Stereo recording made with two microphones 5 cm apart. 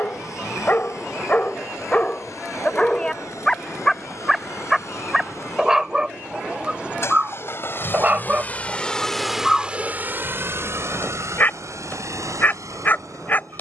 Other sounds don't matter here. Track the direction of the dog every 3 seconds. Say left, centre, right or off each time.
left, centre, right, left, left.